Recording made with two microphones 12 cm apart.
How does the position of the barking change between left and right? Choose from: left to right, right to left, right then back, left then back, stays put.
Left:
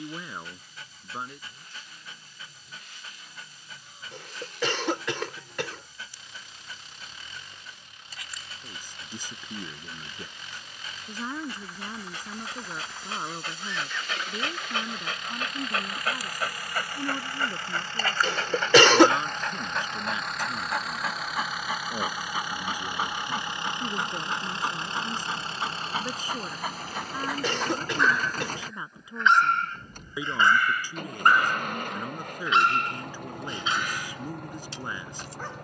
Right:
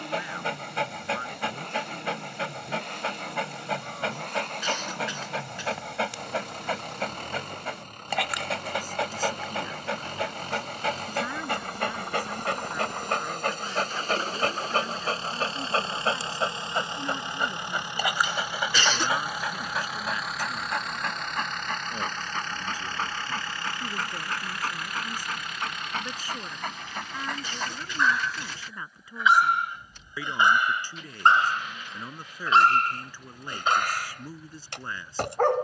left then back.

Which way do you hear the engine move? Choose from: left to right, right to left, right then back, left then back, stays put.
right to left.